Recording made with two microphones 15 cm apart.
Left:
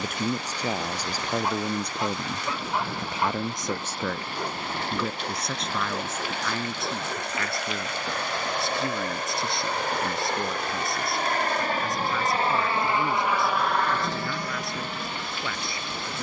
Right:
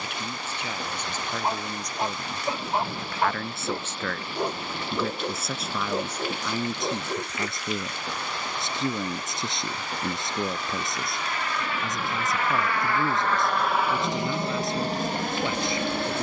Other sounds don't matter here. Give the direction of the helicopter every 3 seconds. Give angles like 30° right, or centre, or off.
70° left, 70° left, 70° left, 50° left, centre, 50° right.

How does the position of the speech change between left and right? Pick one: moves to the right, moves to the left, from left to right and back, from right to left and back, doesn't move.
moves to the right.